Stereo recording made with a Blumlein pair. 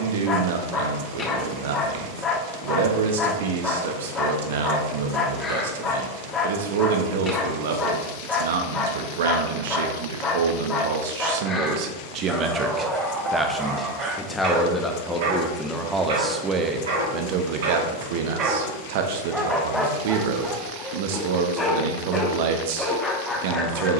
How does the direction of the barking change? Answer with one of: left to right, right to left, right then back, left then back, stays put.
right then back.